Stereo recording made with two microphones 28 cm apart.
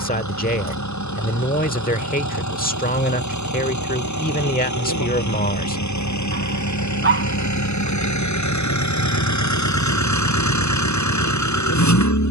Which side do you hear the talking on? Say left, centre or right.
left.